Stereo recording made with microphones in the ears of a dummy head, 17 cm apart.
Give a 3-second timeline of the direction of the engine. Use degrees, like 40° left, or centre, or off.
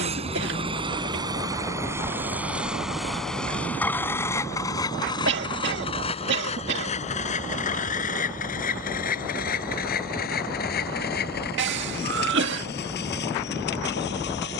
20° right, 20° left, 40° left, 50° left, 60° left.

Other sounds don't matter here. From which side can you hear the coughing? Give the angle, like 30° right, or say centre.
60° right.